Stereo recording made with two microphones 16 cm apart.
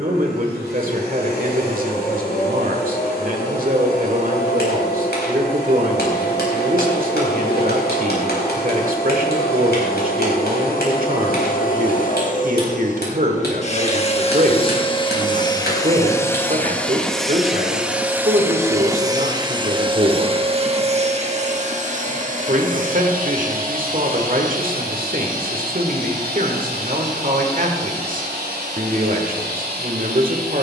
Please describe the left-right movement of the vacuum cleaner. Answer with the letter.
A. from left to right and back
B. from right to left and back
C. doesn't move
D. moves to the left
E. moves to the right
E.